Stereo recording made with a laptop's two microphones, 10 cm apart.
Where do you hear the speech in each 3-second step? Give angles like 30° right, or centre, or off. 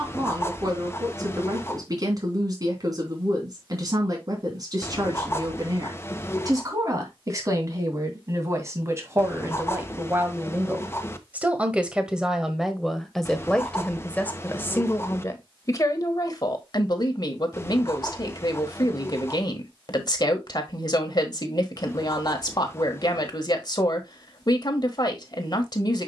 40° right, 40° right, 30° right, 20° right, 10° left, 40° left, 50° left, 50° left, 50° left.